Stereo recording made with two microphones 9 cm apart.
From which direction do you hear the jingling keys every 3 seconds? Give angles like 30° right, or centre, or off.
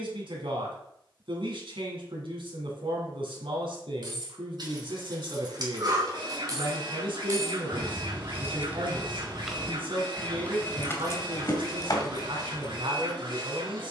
off, 50° right, 30° right, 20° left, 50° left.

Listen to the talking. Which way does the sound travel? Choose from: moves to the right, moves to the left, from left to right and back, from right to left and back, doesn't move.
doesn't move.